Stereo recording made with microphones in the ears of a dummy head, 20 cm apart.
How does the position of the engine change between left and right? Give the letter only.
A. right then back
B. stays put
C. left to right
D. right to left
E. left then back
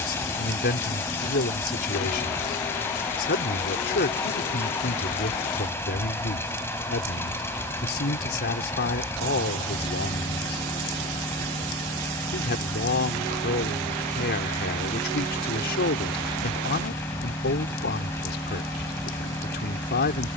B.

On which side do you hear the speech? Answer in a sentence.
You can hear the speech on the left.